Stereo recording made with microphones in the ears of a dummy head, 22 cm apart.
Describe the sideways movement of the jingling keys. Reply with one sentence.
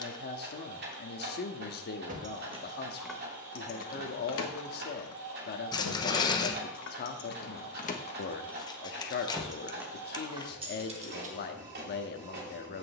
You can hear the jingling keys move from right to left and back again.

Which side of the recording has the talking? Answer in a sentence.
You can hear the talking on the left.